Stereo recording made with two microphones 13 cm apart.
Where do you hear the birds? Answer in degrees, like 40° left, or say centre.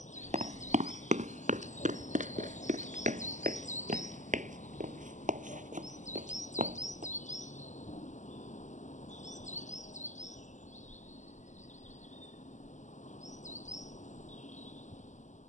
70° left.